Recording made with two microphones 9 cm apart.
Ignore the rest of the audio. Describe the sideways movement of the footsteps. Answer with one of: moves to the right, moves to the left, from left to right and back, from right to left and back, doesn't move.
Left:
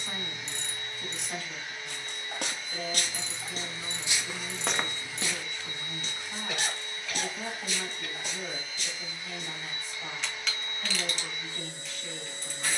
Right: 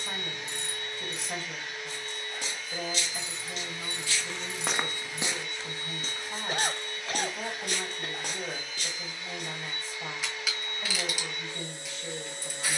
moves to the right.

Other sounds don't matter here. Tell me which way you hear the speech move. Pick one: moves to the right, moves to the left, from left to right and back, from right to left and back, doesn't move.
doesn't move.